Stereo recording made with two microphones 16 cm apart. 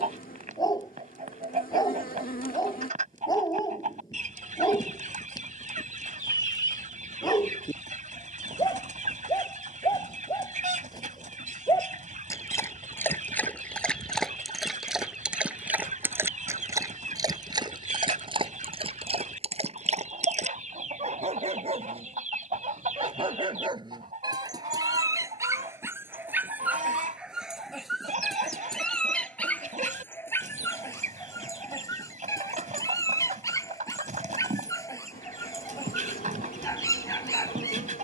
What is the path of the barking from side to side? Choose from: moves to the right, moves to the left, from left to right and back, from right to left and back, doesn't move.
from left to right and back.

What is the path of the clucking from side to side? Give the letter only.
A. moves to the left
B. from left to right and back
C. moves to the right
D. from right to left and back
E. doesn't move
E.